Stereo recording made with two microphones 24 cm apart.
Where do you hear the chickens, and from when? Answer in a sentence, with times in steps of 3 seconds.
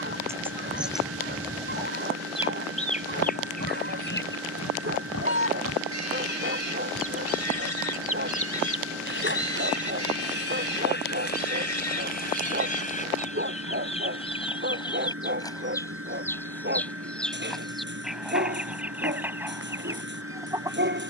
In this clip you hear the chickens in the centre from 0 s, on the left from 3 s and in the centre from 15 s.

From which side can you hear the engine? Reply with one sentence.
You can hear the engine on the right.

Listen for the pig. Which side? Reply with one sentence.
In this clip you hear the pig on the left.